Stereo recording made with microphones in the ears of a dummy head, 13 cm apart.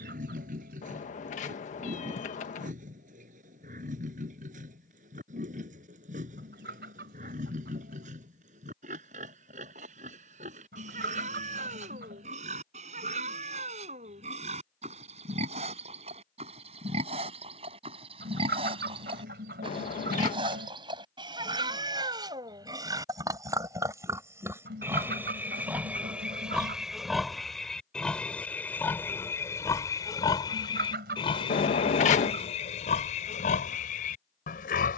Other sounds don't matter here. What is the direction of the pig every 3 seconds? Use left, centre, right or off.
right, right, right, right, right, right, right, right, centre, centre, left, left.